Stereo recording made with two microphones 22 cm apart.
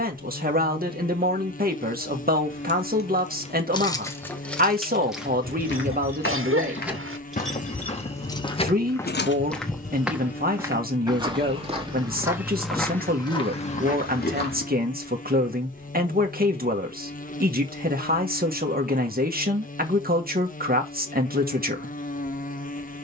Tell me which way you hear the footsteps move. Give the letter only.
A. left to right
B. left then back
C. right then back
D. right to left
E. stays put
C.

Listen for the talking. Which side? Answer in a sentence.
In this clip you hear the talking on the right.